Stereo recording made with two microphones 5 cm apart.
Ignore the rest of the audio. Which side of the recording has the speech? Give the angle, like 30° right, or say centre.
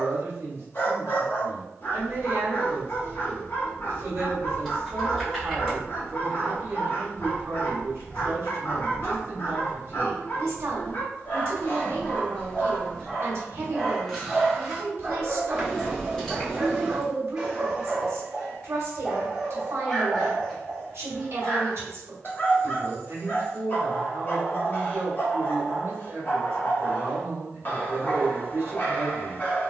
60° right.